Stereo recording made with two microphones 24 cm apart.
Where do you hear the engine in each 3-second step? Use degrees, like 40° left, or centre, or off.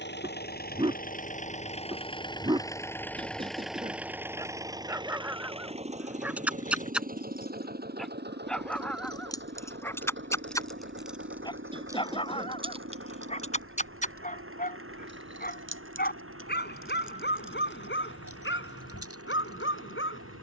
30° left, 10° right, 40° right, 50° right, 60° right, 60° right, 70° right.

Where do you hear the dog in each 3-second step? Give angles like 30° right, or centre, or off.
20° right, 10° right, centre, 10° left, 30° left, 50° left, 60° left.